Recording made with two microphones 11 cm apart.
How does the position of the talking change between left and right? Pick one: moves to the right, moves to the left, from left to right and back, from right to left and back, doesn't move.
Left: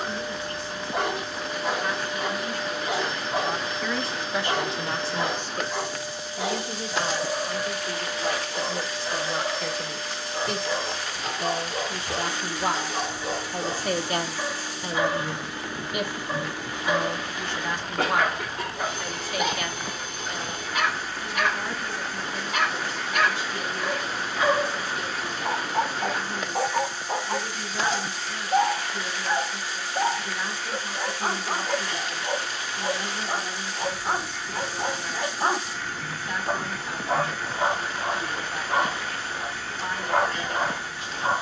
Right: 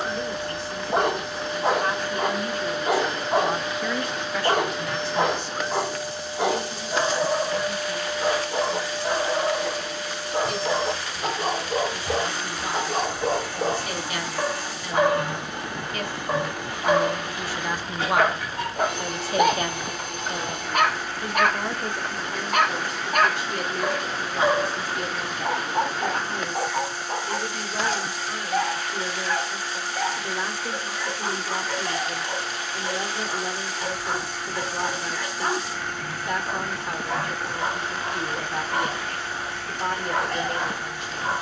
from right to left and back.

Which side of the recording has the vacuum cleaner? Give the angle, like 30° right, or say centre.
70° right.